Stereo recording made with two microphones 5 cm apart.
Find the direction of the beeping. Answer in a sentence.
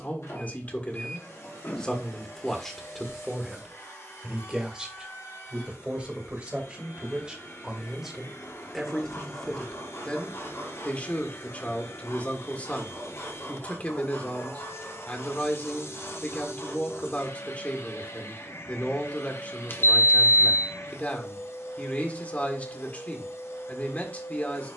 You can hear the beeping on the left.